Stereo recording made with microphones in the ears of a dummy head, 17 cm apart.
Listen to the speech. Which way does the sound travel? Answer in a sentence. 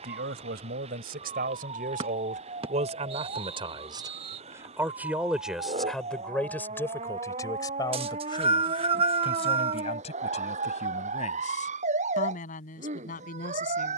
In this clip you hear the speech move to the left.